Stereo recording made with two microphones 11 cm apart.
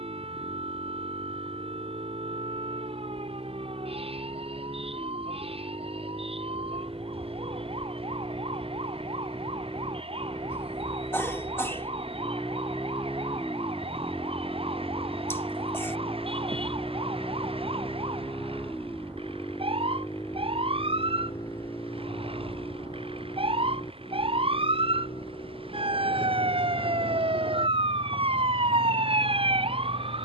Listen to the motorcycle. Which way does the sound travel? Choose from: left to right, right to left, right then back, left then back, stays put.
right to left.